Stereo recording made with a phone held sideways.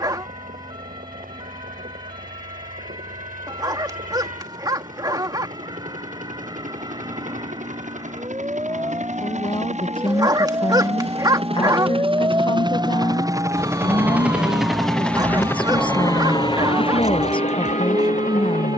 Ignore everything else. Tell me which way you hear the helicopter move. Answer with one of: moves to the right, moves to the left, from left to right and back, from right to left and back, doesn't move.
moves to the left.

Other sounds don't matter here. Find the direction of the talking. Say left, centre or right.
left.